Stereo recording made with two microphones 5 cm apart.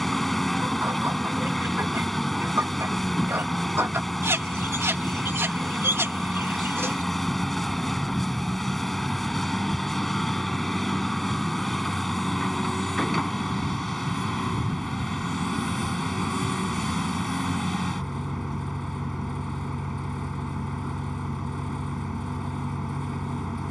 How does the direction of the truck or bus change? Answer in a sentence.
In this clip you hear the truck or bus stay in one place.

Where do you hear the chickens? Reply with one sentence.
In this clip you hear the chickens on the right.